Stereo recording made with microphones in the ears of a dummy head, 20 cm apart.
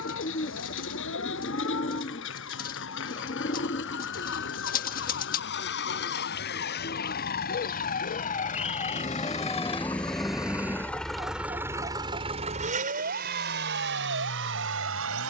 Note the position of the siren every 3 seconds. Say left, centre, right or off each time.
left, left, left, centre, right.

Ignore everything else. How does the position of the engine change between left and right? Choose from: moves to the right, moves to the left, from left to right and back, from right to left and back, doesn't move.
moves to the right.